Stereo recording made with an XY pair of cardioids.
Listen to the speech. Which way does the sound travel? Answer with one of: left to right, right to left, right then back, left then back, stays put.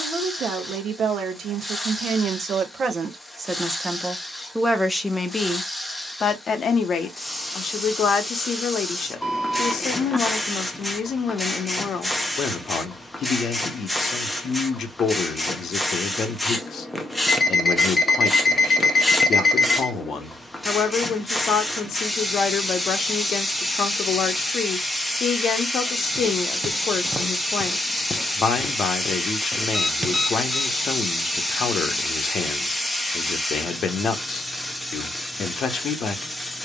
right to left.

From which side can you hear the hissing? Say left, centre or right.
centre.